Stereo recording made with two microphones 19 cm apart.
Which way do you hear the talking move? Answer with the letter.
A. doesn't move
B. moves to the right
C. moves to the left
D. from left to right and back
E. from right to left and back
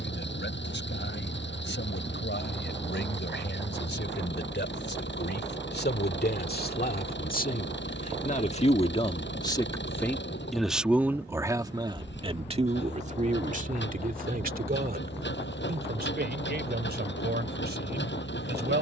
B.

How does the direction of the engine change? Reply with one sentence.
In this clip you hear the engine stay in one place.